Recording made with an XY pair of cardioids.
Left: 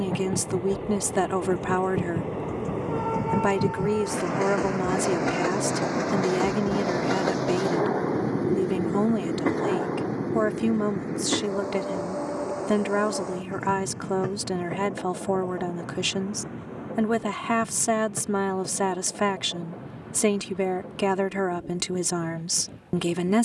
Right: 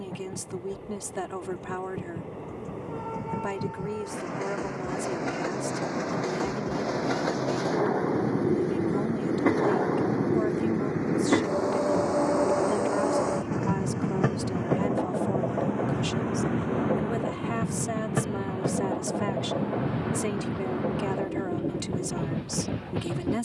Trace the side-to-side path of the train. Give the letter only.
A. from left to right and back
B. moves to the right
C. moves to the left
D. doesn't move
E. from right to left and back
B.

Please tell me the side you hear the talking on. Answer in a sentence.
You can hear the talking on the left.